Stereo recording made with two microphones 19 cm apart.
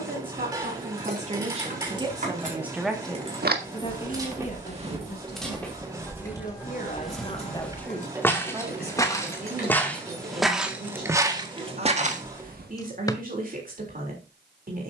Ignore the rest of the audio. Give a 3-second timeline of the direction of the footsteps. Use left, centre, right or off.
off, right, centre, centre, right.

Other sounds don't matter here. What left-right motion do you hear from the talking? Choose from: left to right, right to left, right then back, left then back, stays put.
left then back.